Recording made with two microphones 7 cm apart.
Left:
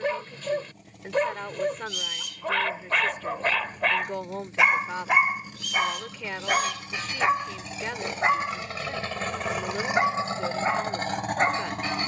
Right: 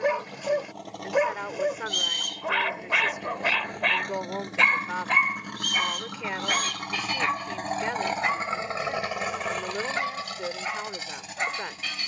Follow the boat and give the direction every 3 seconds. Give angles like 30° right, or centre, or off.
80° right, 70° right, 50° right, 30° left.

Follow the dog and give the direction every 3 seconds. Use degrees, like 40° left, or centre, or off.
10° right, 10° left, 20° left, 30° left.